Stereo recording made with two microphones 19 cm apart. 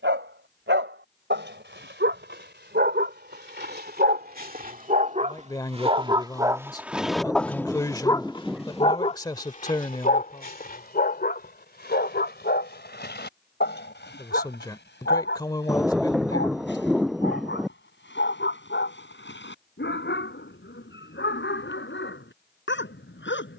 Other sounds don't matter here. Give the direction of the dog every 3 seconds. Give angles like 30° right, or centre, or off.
70° right, 50° right, centre, 50° left, 60° left, 70° left, 70° left, 80° left.